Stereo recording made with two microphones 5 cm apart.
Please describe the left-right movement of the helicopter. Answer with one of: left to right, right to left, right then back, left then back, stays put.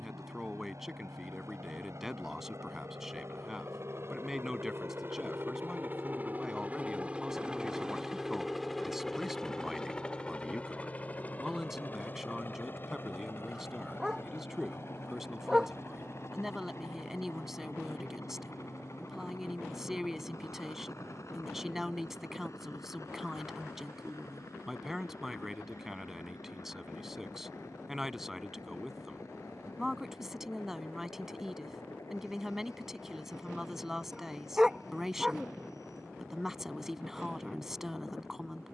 right to left.